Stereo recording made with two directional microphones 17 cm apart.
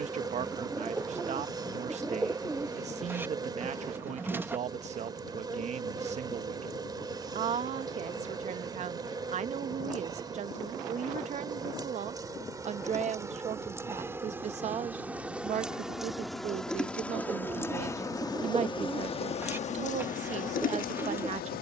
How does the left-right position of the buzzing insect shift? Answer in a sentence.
You can hear the buzzing insect move to the left.